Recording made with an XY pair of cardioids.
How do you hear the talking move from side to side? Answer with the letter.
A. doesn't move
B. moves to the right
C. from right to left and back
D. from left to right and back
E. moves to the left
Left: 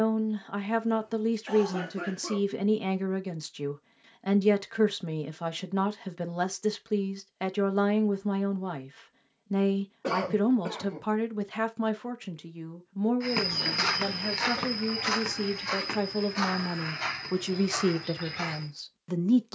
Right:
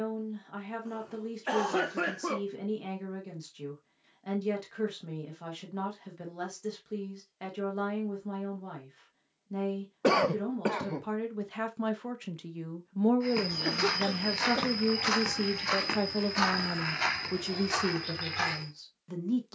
D.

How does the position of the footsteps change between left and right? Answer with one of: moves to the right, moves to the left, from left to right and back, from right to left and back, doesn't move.
moves to the right.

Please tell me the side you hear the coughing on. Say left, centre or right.
right.